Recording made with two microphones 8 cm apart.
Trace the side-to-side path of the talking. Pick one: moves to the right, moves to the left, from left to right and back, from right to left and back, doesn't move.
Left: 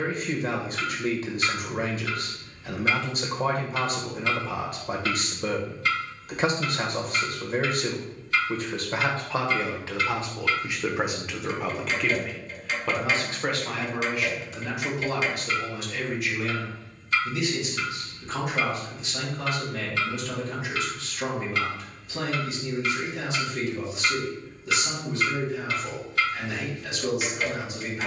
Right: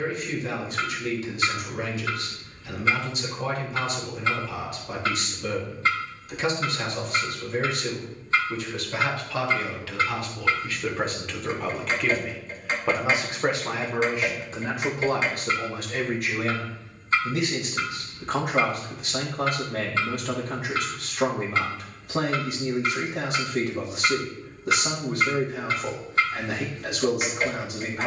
moves to the right.